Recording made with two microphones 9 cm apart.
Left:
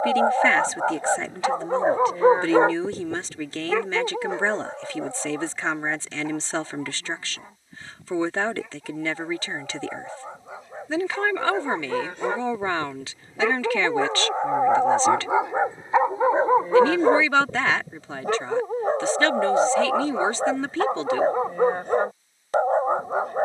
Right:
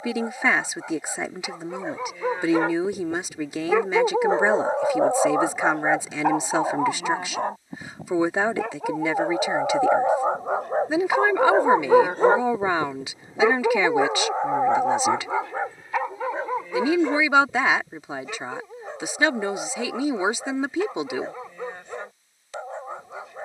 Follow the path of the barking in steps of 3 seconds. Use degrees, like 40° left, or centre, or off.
50° left, 40° right, 70° right, 60° right, 20° right, 30° left, 50° left, 50° left.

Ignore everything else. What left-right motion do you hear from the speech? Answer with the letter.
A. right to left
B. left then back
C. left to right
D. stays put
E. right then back
D.